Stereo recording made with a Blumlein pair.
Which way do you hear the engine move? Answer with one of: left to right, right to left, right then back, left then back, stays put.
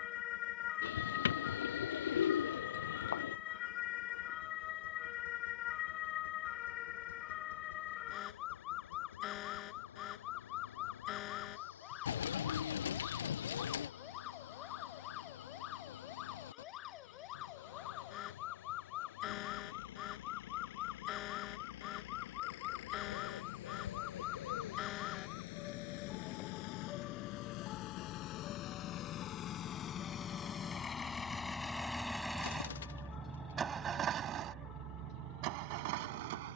left to right.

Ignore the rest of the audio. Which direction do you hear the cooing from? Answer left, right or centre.
left.